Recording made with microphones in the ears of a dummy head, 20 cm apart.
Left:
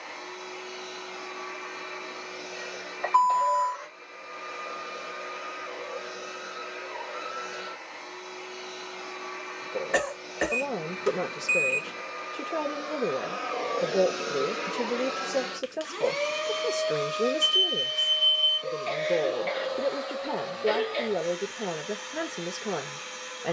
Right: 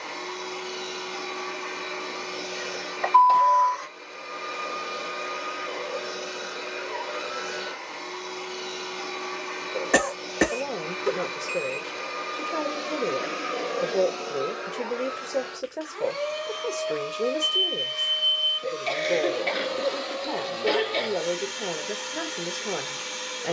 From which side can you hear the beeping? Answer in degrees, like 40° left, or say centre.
30° left.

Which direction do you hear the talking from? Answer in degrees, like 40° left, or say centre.
10° left.